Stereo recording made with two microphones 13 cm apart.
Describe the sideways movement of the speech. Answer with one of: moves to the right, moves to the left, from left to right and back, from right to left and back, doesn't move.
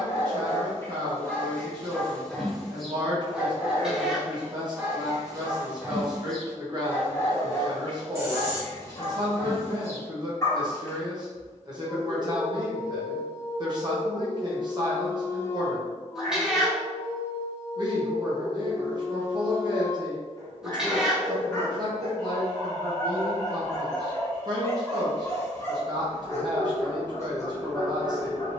doesn't move.